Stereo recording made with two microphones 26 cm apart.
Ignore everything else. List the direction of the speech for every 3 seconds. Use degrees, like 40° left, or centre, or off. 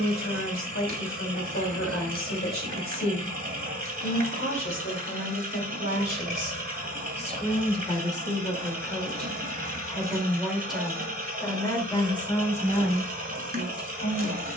50° left, 50° left, 20° left, centre, 30° left.